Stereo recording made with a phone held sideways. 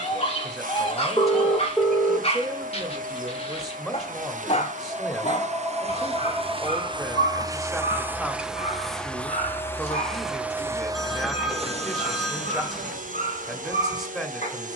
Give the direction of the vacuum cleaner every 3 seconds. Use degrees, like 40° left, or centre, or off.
60° right, 60° right, 20° right, 10° right, 60° right.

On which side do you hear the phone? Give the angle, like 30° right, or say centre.
centre.